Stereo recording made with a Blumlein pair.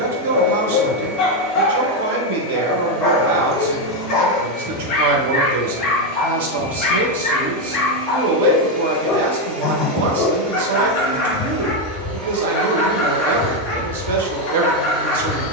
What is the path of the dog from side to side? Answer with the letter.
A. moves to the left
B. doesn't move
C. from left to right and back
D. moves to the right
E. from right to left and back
B.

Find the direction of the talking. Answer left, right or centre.
right.